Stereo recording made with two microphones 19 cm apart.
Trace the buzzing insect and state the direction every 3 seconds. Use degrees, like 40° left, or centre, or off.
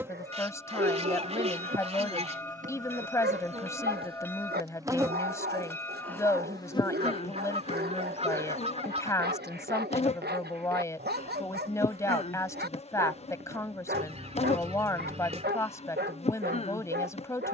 40° right, 20° right, 30° left, 30° left, 30° left, 30° left.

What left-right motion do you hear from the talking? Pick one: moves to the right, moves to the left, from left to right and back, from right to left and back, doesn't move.
doesn't move.